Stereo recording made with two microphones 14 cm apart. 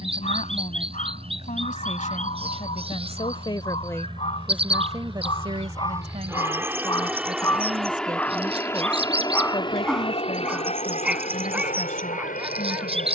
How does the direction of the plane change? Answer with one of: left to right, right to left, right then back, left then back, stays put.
right to left.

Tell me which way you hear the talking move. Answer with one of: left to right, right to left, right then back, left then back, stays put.
right then back.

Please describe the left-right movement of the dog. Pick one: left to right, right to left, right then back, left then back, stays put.
left to right.